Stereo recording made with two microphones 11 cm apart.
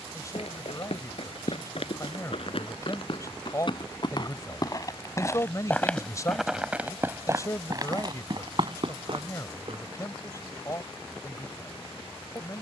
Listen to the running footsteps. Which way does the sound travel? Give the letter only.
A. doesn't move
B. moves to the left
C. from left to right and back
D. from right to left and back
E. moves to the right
E.